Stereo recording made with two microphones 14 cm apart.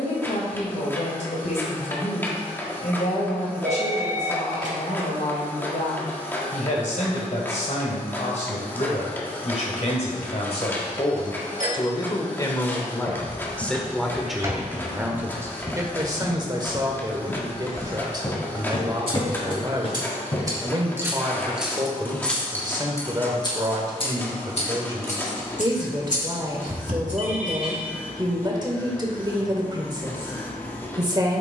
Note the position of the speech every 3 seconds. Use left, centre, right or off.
left, left, left, left, centre, right, right, right, right, right, right.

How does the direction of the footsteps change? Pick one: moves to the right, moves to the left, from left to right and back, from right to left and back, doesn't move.
moves to the left.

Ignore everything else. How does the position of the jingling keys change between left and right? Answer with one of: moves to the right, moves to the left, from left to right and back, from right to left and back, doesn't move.
moves to the left.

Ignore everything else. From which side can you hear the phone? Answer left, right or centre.
right.